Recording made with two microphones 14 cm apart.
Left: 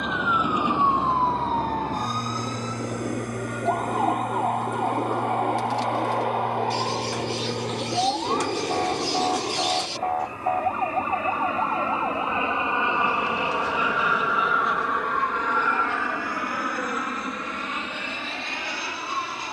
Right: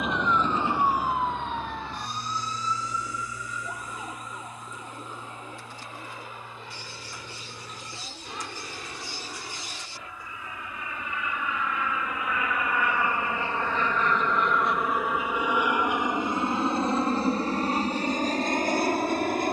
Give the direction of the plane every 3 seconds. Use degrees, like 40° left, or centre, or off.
80° left, 70° left, 60° left, 50° left, 20° left, 20° right, 40° right.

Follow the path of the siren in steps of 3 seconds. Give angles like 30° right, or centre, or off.
30° left, 60° left, 70° left, 70° left, 80° left, 80° left, 80° left.